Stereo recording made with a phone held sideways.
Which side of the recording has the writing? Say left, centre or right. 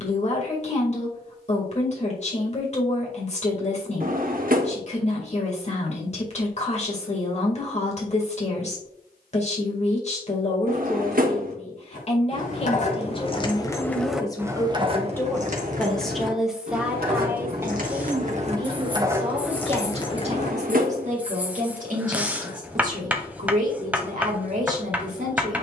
centre.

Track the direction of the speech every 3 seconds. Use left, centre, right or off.
left, left, left, left, left, centre, right, right, right.